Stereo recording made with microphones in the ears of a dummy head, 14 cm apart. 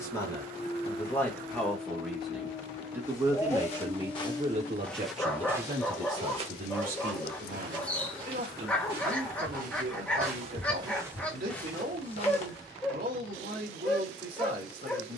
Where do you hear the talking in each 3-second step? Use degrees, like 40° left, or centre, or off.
10° left, 40° right, 60° right, 70° right, 70° right.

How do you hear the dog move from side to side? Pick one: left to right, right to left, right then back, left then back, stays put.
stays put.